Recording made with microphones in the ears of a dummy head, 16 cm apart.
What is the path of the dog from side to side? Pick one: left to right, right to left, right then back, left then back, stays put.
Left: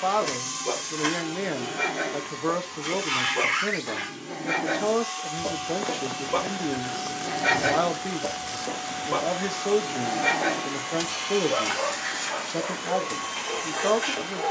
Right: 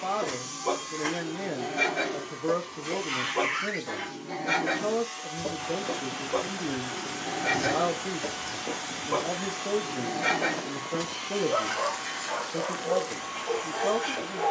left then back.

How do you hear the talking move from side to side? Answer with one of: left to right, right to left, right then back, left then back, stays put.
stays put.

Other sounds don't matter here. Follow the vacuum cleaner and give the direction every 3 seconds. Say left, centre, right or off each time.
left, left, centre, left, left.